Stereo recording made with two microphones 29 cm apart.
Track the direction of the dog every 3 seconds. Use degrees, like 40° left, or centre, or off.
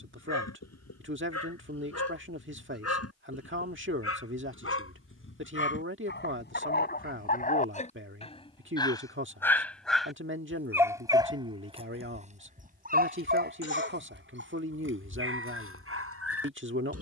60° left, 50° left, 30° left, 10° right, 30° right, 50° right.